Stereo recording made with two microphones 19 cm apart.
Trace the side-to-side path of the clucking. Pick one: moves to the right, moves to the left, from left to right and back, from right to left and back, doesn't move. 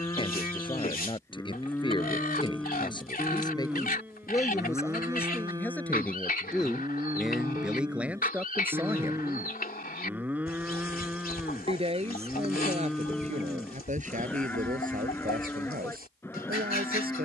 doesn't move.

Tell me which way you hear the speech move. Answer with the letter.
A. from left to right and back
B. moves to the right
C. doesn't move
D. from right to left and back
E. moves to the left
B.